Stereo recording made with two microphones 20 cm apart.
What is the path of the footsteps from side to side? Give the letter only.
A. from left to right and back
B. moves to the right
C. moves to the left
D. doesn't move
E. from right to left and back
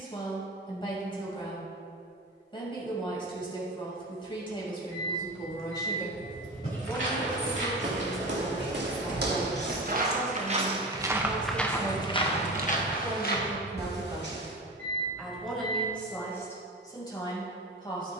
C.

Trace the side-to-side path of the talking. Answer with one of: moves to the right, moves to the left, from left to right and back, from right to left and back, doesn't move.
from left to right and back.